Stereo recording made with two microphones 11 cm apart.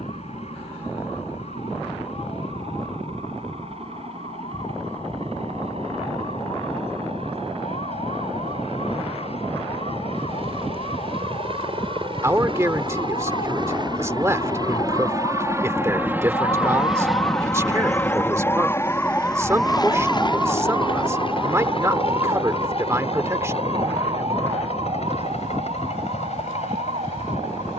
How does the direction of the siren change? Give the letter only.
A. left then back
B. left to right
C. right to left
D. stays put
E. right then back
B.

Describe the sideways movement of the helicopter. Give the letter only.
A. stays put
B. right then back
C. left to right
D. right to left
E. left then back
D.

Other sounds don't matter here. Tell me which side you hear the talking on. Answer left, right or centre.
right.